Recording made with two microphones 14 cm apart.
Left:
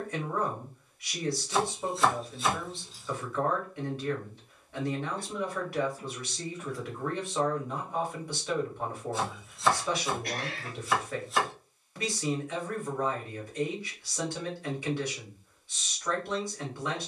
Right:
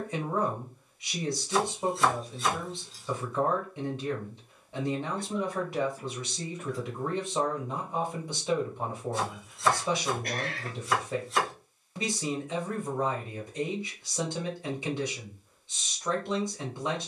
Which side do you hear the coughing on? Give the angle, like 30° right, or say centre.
50° right.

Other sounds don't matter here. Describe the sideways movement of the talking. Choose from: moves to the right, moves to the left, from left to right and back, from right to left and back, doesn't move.
doesn't move.